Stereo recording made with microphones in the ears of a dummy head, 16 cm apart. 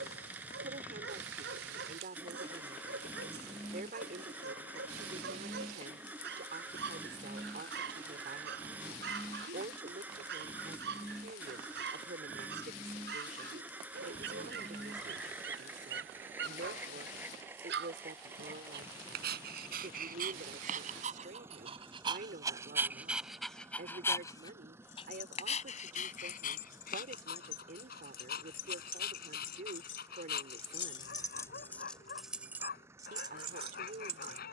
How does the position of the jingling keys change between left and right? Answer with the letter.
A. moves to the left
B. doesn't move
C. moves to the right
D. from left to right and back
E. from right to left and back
C.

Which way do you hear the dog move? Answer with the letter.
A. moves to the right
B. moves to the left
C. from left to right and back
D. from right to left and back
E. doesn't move
B.